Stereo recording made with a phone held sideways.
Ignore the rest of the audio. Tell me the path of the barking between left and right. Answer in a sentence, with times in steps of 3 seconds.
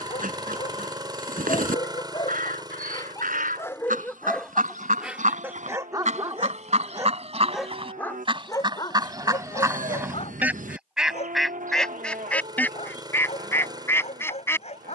In this clip you hear the barking on the left from 0 s, in the centre from 3 s and on the left from 9 s.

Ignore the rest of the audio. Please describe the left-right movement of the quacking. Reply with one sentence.
In this clip you hear the quacking travel towards the left.